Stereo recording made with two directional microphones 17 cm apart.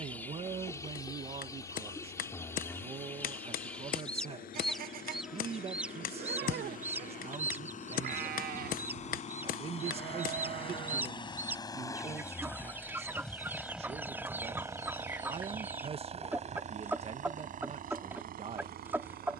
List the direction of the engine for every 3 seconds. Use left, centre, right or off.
left, left, left, left, centre, right, right.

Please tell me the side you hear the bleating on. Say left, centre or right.
right.